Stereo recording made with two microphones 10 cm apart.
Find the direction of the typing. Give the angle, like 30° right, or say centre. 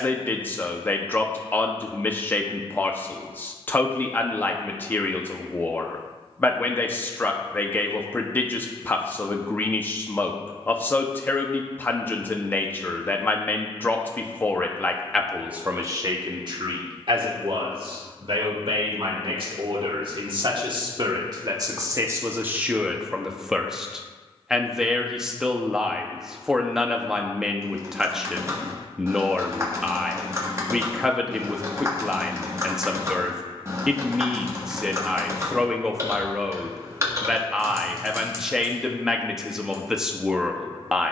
30° right.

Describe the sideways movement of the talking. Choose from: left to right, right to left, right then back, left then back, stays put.
right then back.